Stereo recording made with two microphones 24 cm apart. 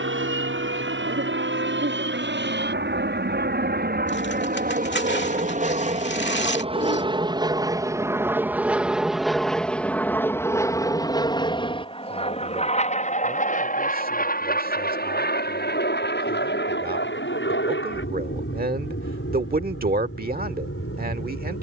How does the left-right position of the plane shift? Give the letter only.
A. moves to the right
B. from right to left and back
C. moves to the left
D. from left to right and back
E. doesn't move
C.